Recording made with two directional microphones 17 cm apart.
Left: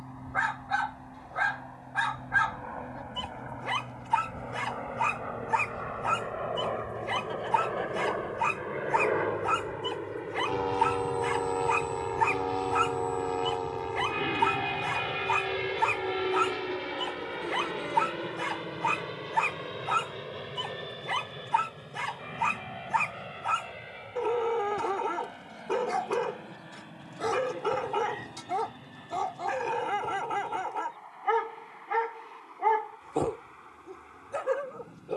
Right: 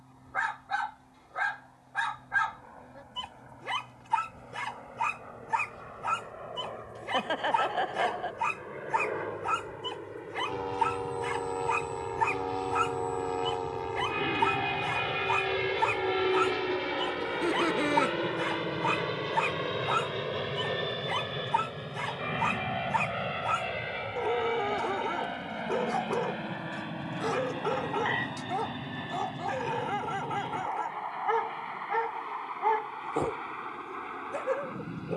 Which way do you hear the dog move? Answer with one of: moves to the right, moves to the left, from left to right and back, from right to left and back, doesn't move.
doesn't move.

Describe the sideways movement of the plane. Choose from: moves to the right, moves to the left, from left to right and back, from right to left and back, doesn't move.
moves to the right.